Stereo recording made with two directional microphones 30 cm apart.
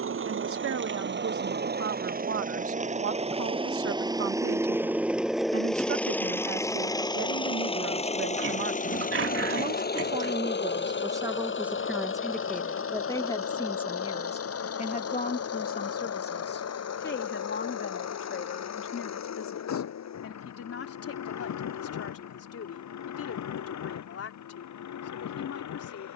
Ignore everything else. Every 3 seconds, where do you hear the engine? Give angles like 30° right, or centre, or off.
30° right, 10° right, 20° left, 30° left, 50° left, 50° left, 60° left, 60° left, 60° left.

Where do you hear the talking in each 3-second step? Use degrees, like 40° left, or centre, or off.
50° right, 50° right, 40° right, 10° right, 10° left, 30° left, 40° left, 50° left, 50° left.